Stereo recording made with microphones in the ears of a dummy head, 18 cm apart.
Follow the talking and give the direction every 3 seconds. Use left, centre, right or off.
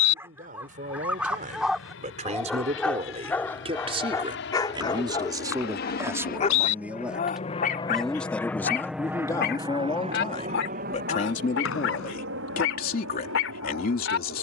right, right, centre, left, left.